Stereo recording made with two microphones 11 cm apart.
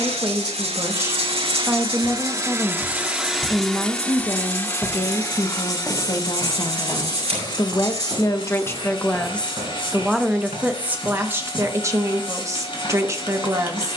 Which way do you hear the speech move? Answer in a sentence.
In this clip you hear the speech go left and come back.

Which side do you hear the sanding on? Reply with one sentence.
You can hear the sanding on the right.